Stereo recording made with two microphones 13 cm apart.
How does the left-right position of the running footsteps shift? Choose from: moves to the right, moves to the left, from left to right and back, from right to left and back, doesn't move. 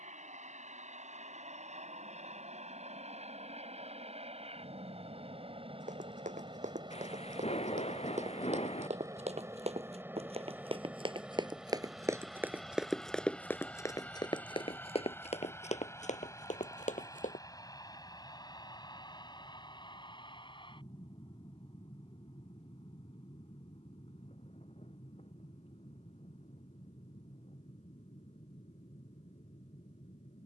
moves to the left.